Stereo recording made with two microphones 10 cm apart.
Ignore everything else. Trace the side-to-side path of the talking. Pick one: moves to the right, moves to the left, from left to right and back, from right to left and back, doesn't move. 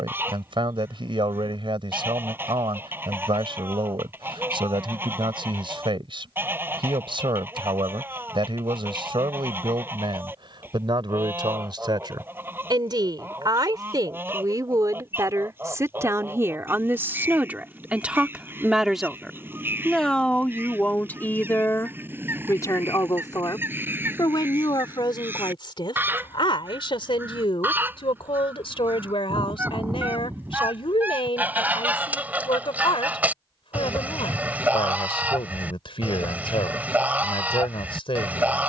moves to the left.